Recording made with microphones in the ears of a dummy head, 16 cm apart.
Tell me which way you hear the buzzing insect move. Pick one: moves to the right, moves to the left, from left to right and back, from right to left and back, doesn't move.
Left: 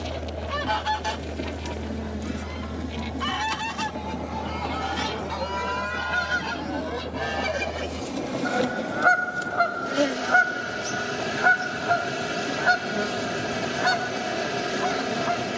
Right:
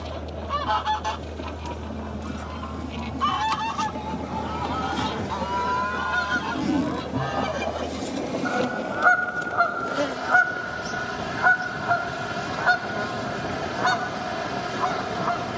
from left to right and back.